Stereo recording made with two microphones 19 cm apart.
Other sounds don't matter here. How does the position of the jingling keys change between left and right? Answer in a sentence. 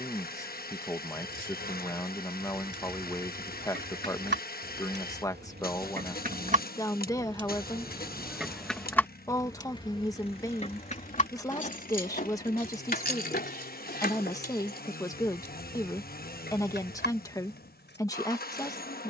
In this clip you hear the jingling keys travel towards the left.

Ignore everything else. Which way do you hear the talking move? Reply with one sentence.
In this clip you hear the talking stay in one place.